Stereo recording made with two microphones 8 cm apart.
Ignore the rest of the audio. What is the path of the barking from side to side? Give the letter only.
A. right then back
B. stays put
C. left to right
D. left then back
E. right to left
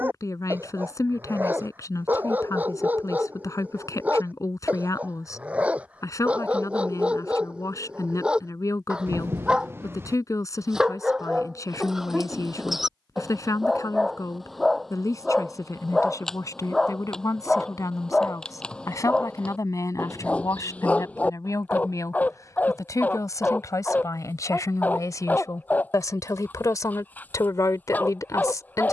E.